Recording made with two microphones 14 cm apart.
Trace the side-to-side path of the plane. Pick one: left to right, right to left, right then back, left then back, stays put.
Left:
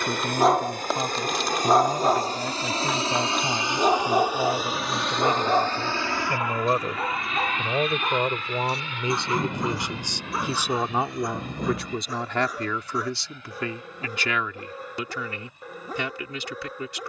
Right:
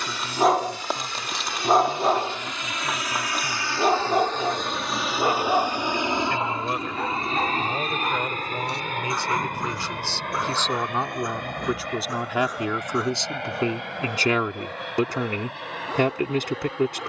left to right.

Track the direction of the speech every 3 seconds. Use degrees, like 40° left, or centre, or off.
50° left, 40° left, 30° left, 10° left, 20° right, 50° right.